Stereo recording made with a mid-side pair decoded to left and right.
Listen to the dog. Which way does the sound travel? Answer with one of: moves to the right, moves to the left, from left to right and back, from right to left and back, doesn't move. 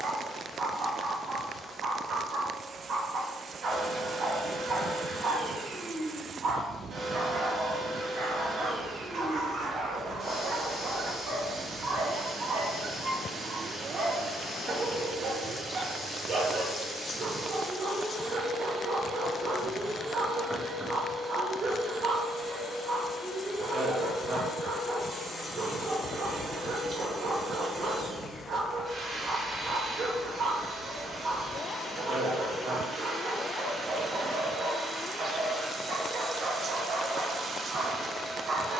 doesn't move.